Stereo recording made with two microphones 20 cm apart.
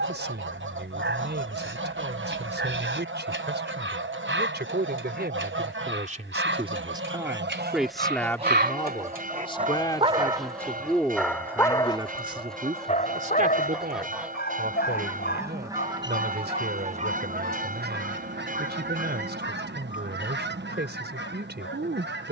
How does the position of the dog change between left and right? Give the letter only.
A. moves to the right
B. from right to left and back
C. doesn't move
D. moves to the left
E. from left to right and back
D.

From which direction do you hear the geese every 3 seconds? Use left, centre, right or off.
right, right, right, centre, centre, right, right, right.